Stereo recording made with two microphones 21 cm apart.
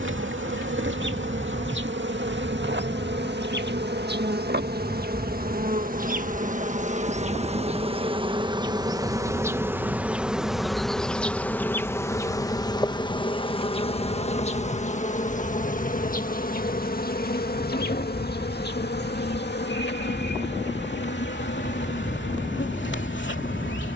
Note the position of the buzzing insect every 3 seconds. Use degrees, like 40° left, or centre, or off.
60° right, 50° right, 30° right, centre, 20° left, 40° left, 50° left, 60° left.